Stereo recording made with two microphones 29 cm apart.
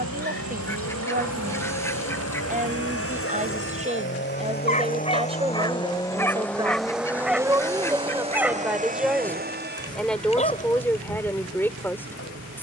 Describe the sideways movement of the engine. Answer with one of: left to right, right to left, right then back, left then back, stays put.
left to right.